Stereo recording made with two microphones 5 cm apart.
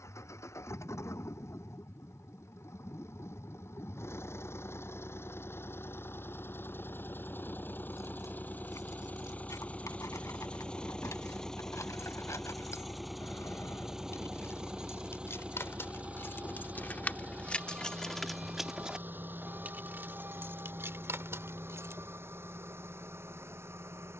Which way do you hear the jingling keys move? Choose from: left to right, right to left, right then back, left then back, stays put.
left to right.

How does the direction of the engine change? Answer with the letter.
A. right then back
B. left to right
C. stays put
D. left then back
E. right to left
B.